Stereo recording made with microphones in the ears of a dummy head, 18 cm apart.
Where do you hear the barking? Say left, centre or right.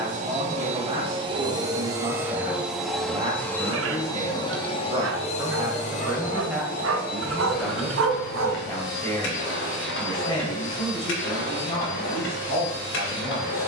right.